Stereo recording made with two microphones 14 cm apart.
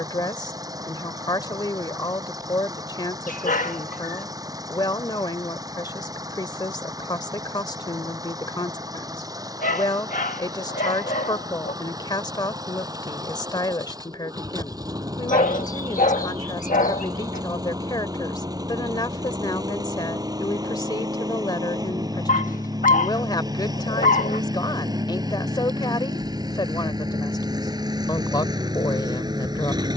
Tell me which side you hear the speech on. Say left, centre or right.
left.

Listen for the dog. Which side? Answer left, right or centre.
left.